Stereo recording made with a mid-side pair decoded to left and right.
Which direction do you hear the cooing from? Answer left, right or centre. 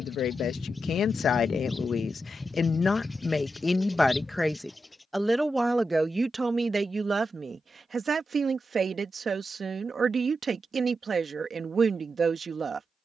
centre.